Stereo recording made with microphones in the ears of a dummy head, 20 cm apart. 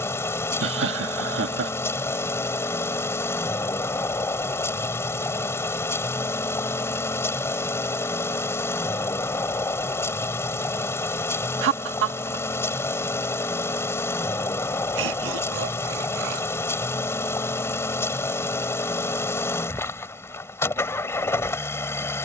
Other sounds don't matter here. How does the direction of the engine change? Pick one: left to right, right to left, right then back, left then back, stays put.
stays put.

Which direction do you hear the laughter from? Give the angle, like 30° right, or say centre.
60° right.